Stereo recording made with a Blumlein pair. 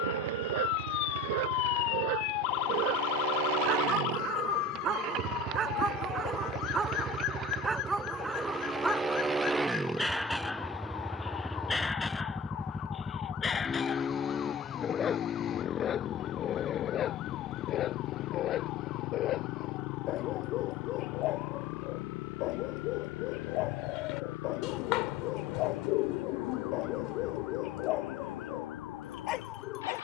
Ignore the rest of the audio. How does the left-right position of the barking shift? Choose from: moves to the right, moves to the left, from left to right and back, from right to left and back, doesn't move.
moves to the left.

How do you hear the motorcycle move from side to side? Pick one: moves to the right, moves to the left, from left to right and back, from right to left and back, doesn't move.
moves to the left.